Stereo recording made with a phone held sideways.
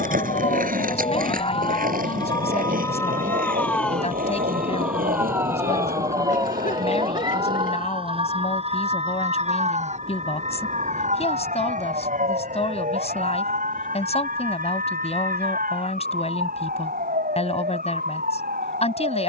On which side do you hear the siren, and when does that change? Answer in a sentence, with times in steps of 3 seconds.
In this clip you hear the siren on the left from 0 s, in the centre from 3 s and on the right from 6 s.